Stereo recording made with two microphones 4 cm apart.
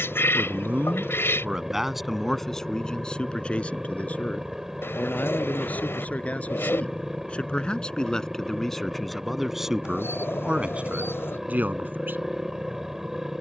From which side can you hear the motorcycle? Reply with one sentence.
In this clip you hear the motorcycle in the centre.